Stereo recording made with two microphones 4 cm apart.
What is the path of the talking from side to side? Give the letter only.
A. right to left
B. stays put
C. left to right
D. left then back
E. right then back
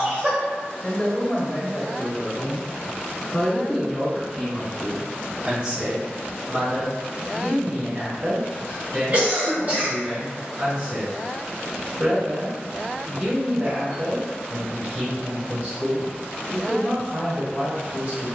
C.